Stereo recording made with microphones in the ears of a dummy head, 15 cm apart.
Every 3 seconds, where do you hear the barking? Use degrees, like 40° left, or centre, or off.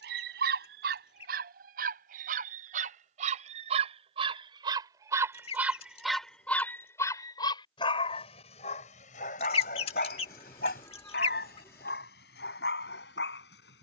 60° right, 30° right, 20° left, 60° left, 70° left.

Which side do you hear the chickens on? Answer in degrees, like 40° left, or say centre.
40° left.